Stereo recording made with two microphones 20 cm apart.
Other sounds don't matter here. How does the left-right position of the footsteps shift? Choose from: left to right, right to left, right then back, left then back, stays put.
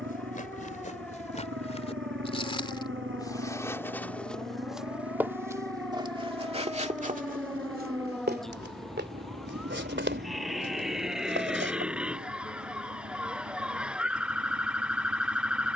left to right.